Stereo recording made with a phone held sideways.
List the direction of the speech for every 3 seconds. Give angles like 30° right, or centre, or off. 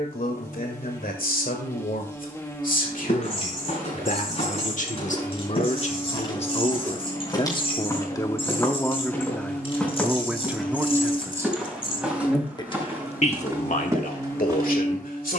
70° left, 60° left, 30° left, 10° right, 60° left.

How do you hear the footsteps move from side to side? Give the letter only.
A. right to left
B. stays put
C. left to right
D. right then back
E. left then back
C.